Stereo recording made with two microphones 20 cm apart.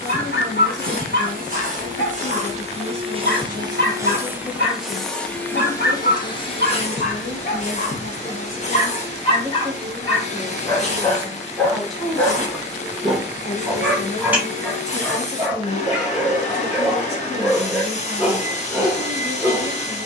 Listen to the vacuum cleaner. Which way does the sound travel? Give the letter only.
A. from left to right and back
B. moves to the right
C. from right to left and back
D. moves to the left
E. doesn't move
D.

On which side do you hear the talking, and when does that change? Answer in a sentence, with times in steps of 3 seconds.
In this clip you hear the talking on the left from 0 s, in the centre from 9 s and on the left from 12 s.